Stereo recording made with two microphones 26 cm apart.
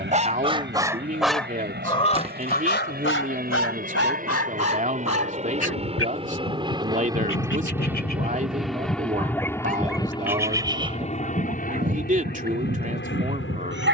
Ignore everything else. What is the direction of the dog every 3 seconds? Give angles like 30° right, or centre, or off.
10° left, 60° left, 50° left, 10° right, 40° right.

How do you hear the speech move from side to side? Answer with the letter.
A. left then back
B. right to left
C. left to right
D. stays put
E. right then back
D.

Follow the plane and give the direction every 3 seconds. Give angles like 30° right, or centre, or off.
50° right, 30° right, 10° right, 20° left, 40° left.